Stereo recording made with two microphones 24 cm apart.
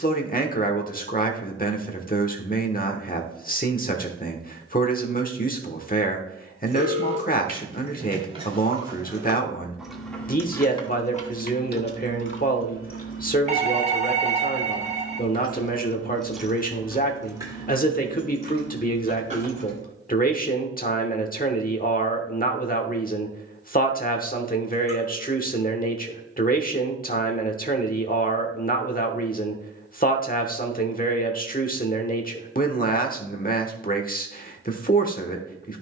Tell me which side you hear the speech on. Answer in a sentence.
In this clip you hear the speech on the left.